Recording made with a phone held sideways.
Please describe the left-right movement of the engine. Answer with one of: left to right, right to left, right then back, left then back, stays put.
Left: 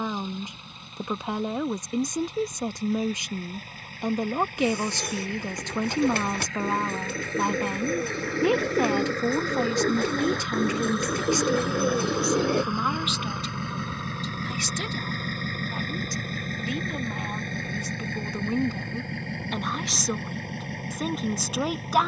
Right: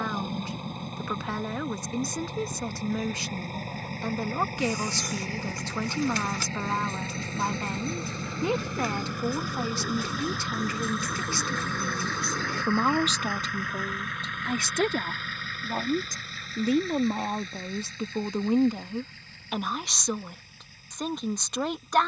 right to left.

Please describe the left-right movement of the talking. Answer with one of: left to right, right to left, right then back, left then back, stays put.
right then back.